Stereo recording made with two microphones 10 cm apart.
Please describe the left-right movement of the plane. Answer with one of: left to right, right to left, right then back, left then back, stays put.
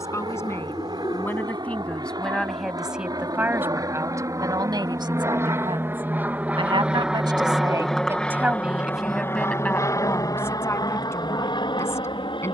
right to left.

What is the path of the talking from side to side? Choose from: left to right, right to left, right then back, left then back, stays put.
right then back.